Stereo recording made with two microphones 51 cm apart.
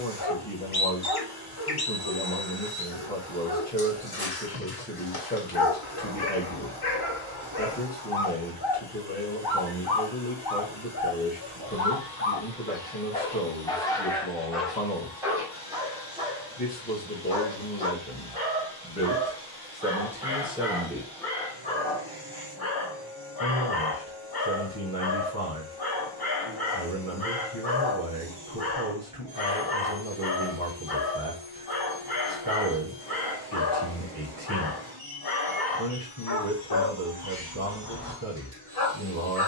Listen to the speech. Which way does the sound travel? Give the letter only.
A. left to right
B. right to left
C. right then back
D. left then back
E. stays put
A.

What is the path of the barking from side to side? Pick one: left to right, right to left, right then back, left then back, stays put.
right then back.